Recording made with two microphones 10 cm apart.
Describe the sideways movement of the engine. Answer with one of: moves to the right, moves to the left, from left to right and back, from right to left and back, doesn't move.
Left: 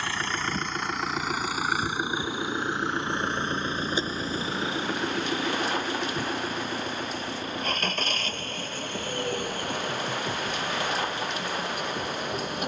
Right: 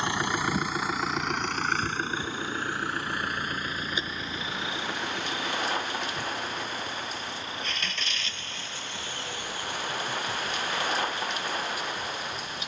moves to the left.